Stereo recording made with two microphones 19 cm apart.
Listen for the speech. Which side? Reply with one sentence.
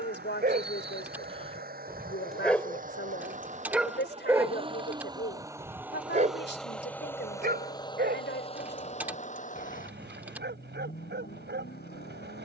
In this clip you hear the speech on the left.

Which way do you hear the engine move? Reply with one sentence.
In this clip you hear the engine move from right to left.